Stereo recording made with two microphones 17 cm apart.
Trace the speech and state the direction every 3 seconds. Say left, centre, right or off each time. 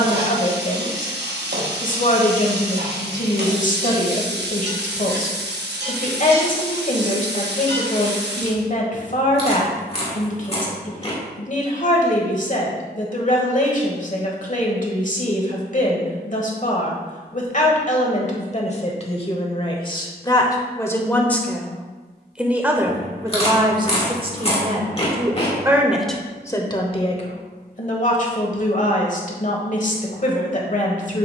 left, left, left, left, left, left, left, centre, centre, left, left.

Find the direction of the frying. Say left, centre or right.
right.